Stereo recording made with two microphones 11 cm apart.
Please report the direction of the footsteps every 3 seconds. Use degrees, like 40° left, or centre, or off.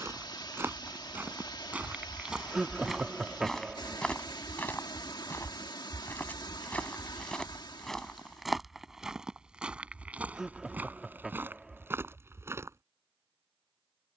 20° right, 10° left, 10° left, 20° right, 30° right.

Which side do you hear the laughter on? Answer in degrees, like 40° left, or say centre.
10° right.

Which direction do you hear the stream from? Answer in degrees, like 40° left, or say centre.
40° left.